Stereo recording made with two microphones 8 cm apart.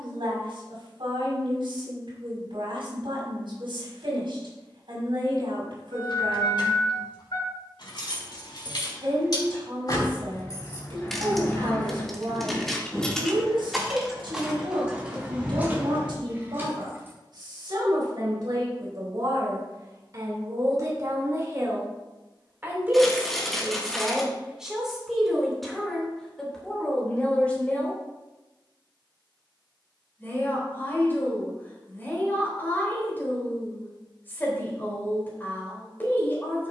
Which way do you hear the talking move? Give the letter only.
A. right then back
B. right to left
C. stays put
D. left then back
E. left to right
B.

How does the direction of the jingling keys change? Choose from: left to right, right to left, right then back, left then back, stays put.
left to right.